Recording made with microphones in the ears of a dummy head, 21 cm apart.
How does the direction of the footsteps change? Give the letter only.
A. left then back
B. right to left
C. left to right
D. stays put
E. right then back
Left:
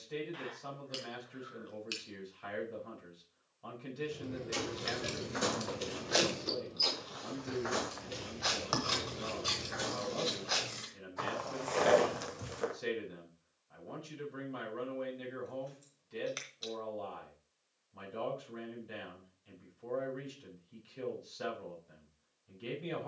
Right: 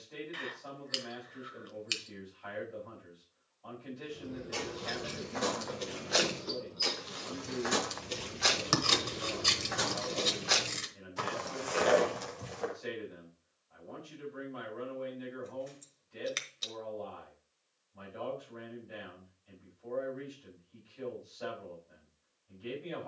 E.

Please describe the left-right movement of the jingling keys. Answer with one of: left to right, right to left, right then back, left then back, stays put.
left to right.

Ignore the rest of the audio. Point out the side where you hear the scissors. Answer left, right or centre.
right.